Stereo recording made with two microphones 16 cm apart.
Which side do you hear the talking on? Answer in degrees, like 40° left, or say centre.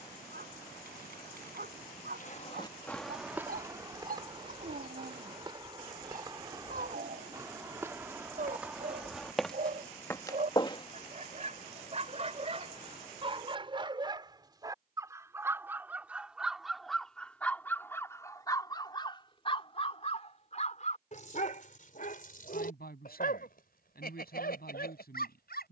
70° left.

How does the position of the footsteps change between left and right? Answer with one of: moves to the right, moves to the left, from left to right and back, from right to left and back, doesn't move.
from left to right and back.